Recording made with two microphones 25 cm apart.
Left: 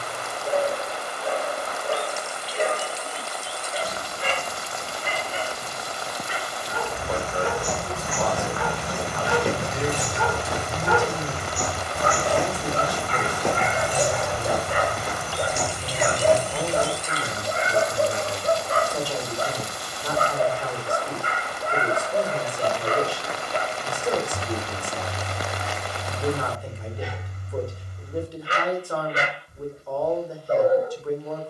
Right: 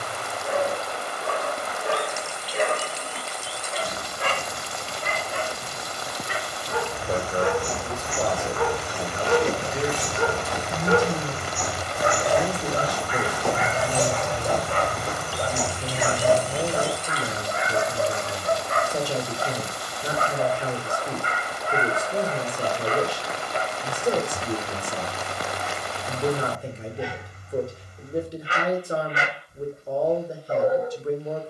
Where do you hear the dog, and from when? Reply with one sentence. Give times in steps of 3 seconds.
You can hear the dog on the right from 0 s, in the centre from 12 s and on the left from 15 s.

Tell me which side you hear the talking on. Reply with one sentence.
In this clip you hear the talking on the right.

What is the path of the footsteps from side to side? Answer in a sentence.
You can hear the footsteps go from the left side to the right.